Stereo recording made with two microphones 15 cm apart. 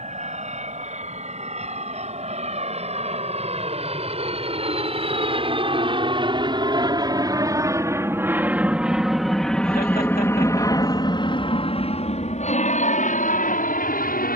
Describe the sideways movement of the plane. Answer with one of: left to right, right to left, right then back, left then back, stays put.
right to left.